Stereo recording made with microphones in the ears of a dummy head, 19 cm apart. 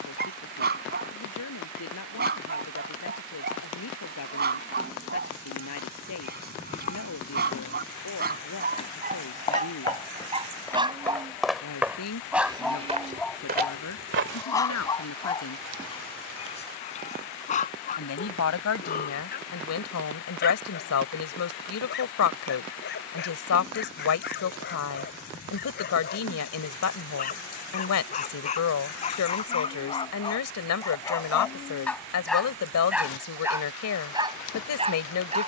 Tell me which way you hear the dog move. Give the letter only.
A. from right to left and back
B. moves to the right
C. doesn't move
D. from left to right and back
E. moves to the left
A.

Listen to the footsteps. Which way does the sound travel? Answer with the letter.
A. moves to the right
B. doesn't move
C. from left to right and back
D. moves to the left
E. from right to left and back
A.